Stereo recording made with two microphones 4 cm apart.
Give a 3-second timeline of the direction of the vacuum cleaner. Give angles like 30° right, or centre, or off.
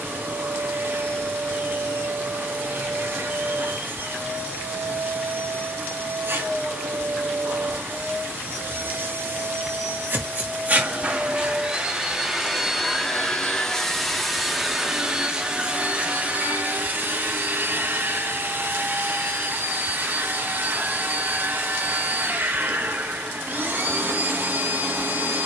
50° right, 50° right, 50° right, 40° right, centre, 30° right, 50° right, 50° right, 50° right.